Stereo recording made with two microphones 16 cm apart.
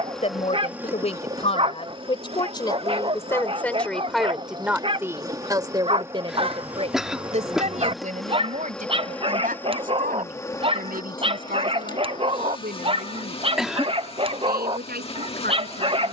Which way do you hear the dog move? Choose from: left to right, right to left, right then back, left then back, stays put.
stays put.